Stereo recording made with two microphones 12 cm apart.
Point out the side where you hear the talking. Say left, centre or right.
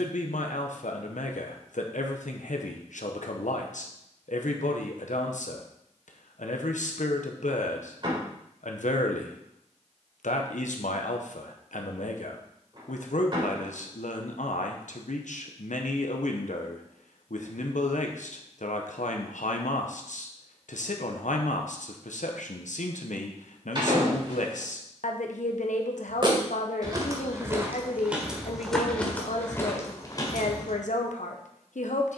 left.